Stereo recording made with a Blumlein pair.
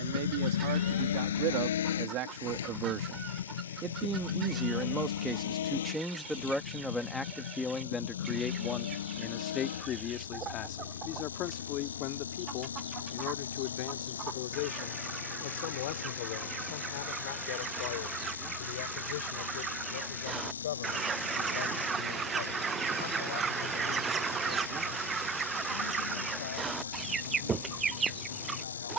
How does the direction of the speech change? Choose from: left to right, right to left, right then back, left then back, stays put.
right to left.